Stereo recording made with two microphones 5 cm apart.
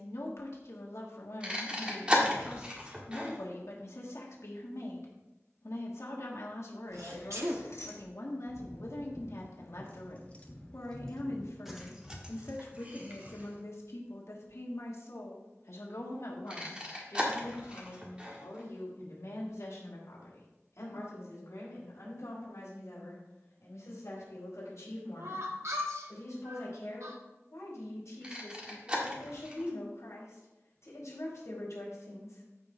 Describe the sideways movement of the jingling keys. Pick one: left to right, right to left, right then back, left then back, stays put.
left to right.